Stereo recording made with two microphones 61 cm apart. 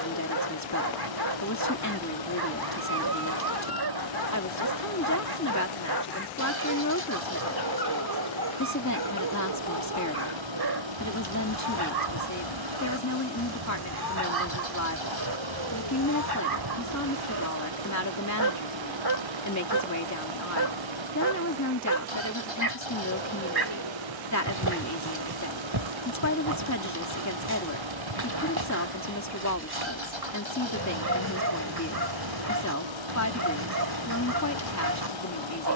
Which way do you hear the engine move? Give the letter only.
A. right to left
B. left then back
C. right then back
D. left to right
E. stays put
E.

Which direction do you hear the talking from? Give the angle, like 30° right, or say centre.
30° left.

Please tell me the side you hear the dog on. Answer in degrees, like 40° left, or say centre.
40° right.